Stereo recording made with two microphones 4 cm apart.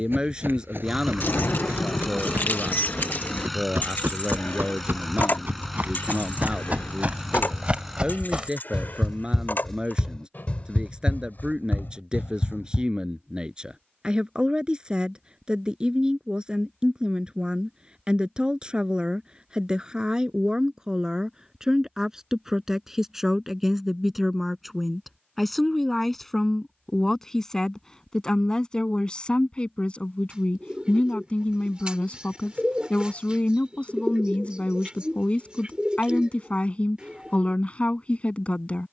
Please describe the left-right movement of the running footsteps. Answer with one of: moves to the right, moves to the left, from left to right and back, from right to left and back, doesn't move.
moves to the left.